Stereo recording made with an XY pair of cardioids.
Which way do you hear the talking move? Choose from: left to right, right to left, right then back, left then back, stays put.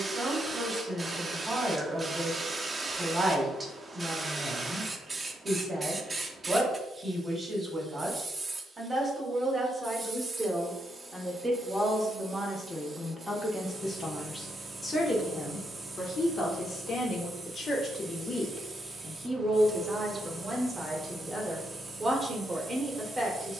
left then back.